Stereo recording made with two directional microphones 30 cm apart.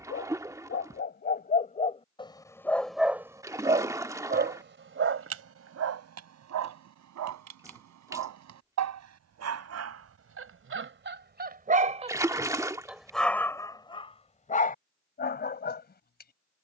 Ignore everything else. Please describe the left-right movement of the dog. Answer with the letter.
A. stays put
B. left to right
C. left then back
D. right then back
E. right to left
D.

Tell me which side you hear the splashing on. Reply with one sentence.
In this clip you hear the splashing in the centre.